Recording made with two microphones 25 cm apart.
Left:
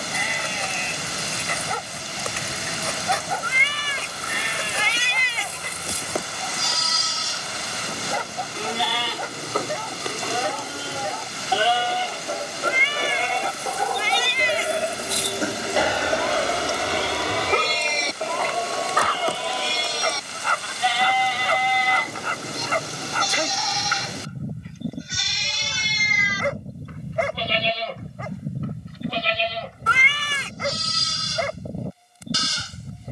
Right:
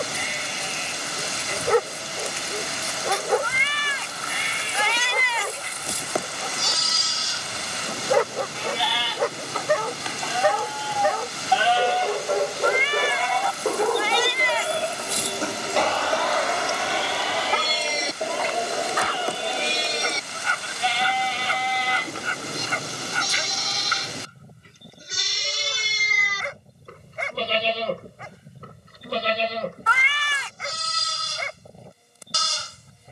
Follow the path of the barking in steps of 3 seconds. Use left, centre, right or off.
right, right, right, right, right, left, left, left, left, left, left.